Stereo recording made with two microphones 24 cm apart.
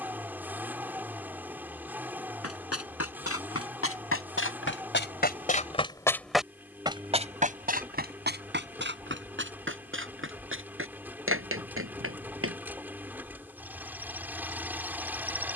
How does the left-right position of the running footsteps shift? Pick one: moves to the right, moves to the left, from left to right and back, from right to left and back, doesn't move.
moves to the right.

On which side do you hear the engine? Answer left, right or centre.
centre.